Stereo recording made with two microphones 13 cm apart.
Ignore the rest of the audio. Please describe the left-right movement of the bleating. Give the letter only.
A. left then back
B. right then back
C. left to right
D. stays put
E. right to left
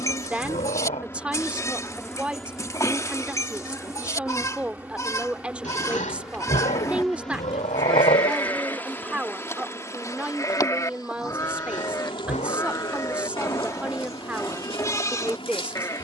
D.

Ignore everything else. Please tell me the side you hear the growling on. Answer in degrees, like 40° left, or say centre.
70° left.